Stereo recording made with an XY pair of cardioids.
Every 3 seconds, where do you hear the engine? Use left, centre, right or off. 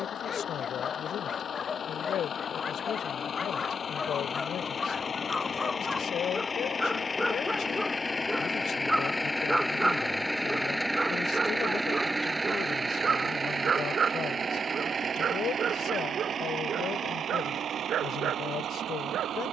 left, left, left, centre, right, right, right.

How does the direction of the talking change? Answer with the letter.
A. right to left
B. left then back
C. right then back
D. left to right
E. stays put
E.